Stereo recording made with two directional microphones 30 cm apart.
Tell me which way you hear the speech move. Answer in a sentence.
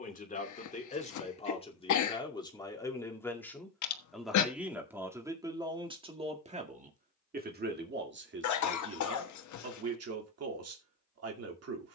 You can hear the speech go from the left side to the right.